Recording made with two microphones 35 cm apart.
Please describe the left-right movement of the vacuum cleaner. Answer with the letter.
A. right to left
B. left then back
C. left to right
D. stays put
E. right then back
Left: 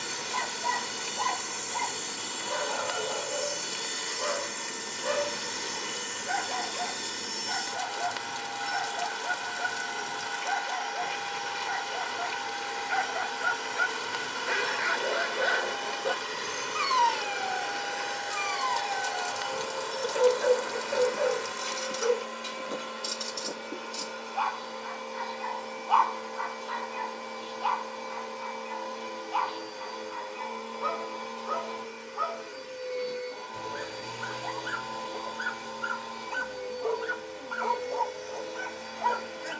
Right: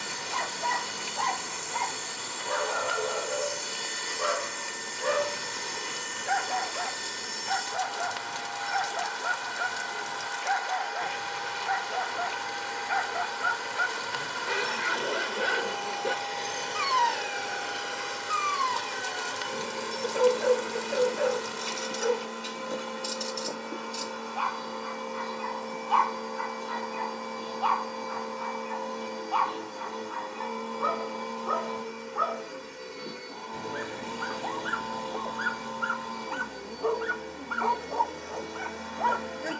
C.